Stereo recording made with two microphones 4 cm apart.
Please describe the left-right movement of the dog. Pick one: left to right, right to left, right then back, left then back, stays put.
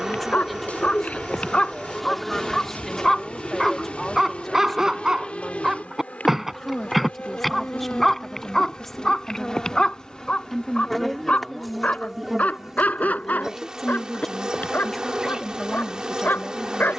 right then back.